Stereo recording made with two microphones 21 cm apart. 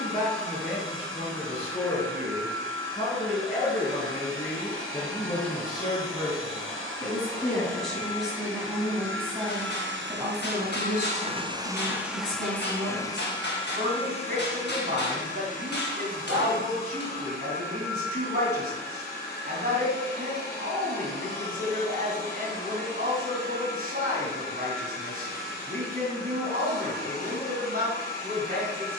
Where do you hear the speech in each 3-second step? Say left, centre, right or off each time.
left, left, centre, right, right, right, right, right, right, right.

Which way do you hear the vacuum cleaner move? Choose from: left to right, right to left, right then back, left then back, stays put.
right to left.